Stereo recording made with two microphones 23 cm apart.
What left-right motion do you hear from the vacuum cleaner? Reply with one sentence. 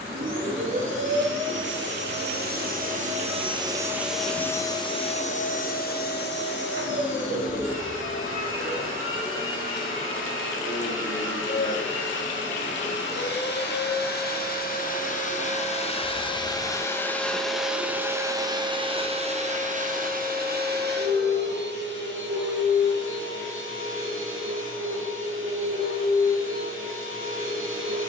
You can hear the vacuum cleaner go left and come back.